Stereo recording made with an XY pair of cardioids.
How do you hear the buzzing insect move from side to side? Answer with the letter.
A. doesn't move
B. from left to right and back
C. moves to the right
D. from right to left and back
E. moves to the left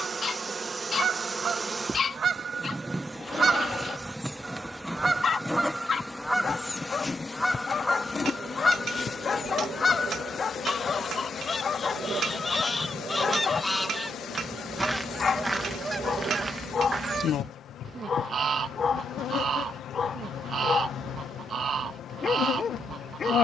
E.